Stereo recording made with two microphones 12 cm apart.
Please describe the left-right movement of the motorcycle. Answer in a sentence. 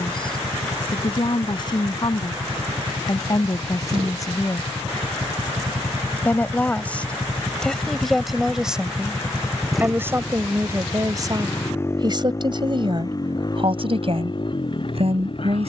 You can hear the motorcycle move to the left.